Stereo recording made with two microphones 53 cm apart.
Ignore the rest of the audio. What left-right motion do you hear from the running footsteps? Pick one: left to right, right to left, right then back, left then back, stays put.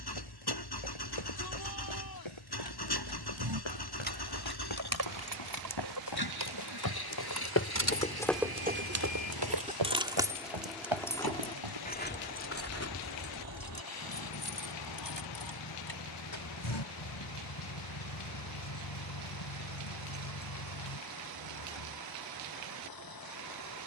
left to right.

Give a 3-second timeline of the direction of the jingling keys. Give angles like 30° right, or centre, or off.
off, 50° right, 40° right, centre, 40° left, 60° left, 80° left, 80° left.